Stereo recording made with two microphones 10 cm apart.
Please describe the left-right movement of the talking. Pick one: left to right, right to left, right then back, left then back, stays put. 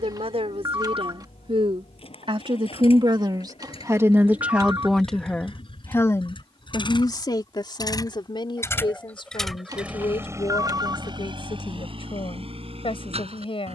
right to left.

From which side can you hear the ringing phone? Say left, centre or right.
right.